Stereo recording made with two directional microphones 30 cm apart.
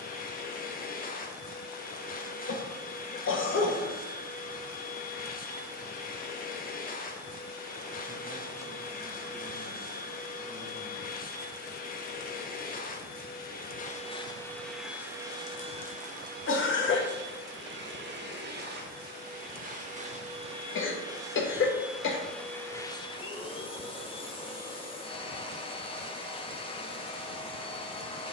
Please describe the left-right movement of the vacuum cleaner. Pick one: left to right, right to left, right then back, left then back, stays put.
right then back.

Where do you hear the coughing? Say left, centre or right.
left.